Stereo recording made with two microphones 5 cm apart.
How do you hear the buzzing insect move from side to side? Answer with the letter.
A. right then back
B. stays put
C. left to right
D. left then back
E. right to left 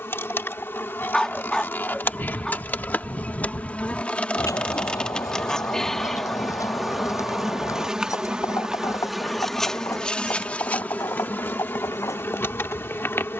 A.